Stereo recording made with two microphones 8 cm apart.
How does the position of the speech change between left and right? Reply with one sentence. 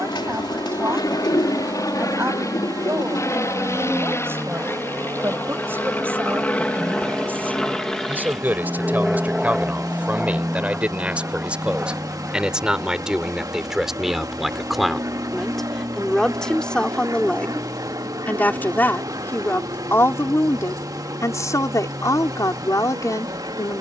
In this clip you hear the speech go from the right side to the left.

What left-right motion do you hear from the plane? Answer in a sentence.
In this clip you hear the plane move to the right.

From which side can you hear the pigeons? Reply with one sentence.
In this clip you hear the pigeons on the left.